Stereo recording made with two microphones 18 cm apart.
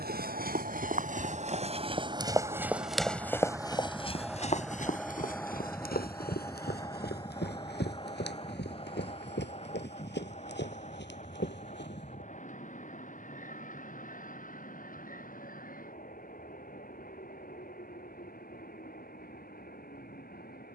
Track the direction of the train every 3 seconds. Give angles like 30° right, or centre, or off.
40° right, centre, 20° left, 40° left, 40° left, 50° left, 50° left.